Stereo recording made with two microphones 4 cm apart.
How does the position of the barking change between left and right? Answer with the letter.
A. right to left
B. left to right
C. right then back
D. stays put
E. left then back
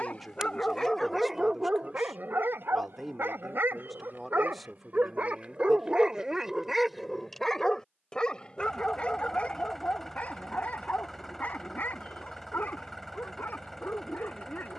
C.